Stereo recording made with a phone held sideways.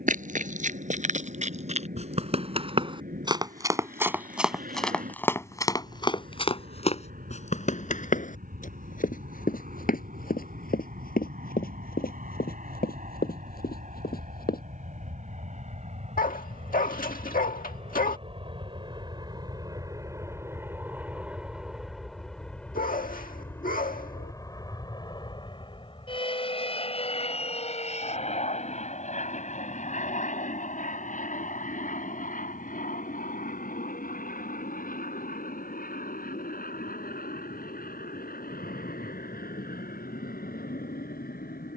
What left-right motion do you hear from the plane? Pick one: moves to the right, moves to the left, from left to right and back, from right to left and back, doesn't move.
moves to the left.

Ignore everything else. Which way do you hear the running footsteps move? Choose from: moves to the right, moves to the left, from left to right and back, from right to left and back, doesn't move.
moves to the left.